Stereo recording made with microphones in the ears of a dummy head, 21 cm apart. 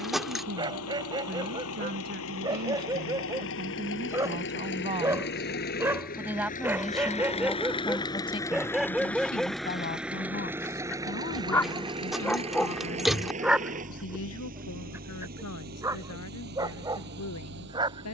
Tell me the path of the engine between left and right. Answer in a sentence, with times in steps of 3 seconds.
In this clip you hear the engine on the left from 0 s, in the centre from 9 s and on the right from 12 s.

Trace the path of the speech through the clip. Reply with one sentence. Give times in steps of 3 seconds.
You can hear the speech on the right from 0 s, in the centre from 6 s and on the left from 9 s.